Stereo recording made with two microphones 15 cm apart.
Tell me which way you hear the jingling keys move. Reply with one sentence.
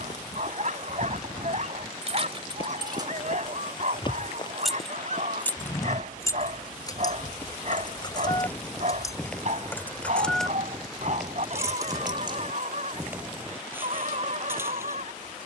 In this clip you hear the jingling keys go left and come back.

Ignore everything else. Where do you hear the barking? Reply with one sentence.
You can hear the barking on the right.